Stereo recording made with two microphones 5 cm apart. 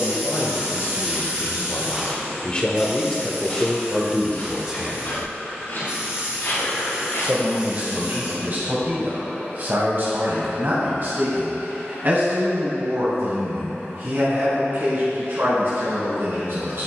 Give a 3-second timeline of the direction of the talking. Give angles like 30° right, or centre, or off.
40° left, centre, 40° right, 50° right, 50° right, 60° right.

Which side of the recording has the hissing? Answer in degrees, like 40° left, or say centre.
30° right.